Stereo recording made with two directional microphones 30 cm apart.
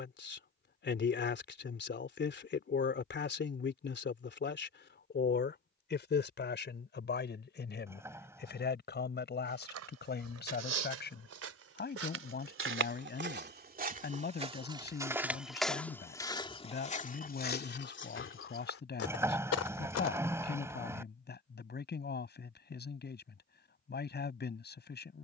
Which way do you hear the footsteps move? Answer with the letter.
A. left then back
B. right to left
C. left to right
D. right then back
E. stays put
B.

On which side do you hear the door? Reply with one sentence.
In this clip you hear the door in the centre.